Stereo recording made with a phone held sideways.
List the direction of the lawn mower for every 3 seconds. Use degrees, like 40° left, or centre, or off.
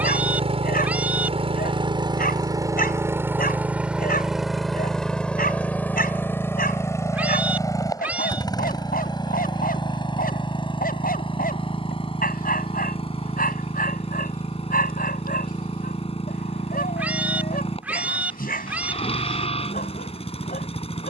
30° right, centre, 20° left, 30° left, 40° left, 40° left, 40° left.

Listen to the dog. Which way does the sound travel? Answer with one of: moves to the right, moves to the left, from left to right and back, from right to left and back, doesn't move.
doesn't move.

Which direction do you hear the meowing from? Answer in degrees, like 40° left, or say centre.
10° right.